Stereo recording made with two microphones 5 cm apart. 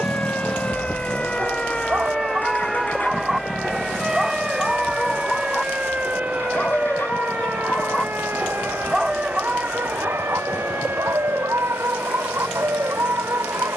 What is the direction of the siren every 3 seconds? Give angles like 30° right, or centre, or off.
20° left, 20° right, 40° right, 50° right, 60° right.